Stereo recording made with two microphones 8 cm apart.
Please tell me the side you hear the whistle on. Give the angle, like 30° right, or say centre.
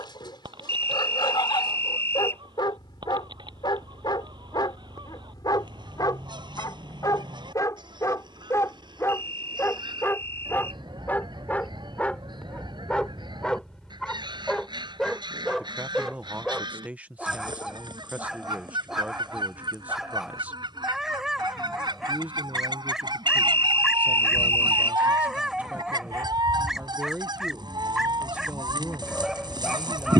30° left.